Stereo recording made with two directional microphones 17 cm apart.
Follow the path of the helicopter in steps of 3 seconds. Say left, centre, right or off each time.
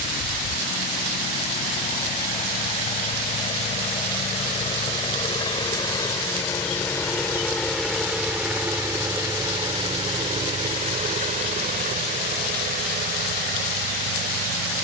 left, left, centre, right, right.